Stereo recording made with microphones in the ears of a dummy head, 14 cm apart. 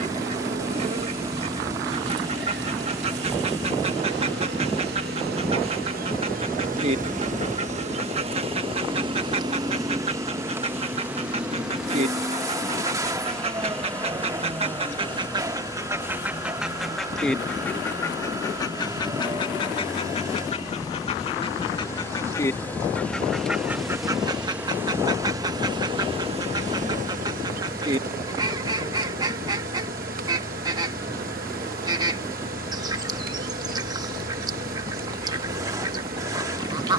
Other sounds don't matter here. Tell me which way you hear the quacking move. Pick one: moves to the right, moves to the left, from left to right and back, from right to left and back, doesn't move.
from right to left and back.